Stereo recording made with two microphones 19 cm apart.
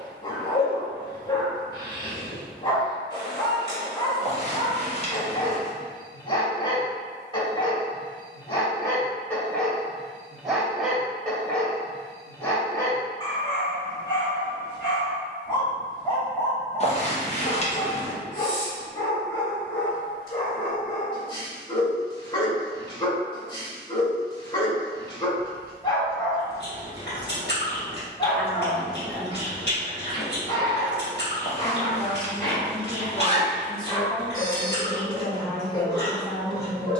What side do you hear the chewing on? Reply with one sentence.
You can hear the chewing on the left.